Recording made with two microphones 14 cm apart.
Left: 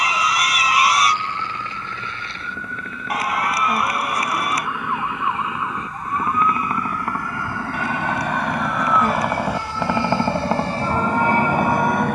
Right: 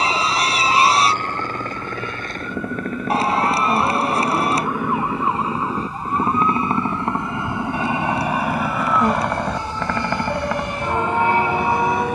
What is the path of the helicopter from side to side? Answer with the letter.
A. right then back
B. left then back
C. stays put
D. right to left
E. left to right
D.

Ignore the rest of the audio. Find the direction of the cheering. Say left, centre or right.
right.